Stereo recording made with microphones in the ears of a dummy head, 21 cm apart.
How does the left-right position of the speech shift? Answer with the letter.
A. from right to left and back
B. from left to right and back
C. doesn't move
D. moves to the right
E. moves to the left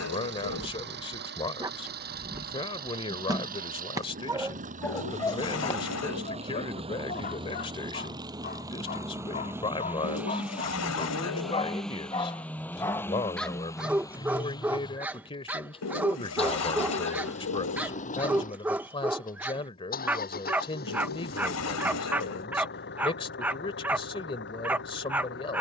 C.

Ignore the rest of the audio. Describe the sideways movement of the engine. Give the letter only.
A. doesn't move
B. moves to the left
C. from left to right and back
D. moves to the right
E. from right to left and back
B.